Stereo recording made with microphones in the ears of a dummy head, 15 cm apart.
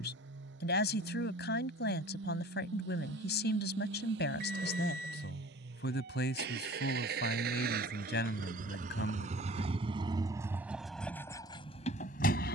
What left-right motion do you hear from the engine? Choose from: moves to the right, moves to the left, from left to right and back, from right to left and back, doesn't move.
moves to the left.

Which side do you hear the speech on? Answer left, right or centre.
left.